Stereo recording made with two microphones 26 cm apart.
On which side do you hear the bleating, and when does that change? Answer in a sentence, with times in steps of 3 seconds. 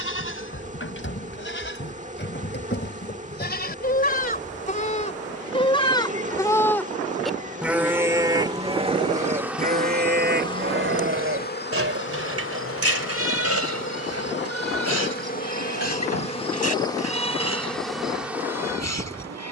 You can hear the bleating on the left from 0 s, in the centre from 6 s and on the right from 9 s.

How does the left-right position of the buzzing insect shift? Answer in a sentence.
In this clip you hear the buzzing insect go left and come back.